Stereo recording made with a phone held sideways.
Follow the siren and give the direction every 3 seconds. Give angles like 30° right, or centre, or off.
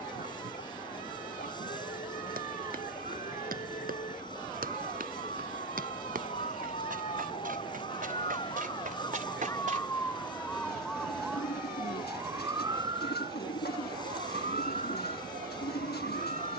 60° left, 50° left, 40° left, 10° left, 30° right, 50° right.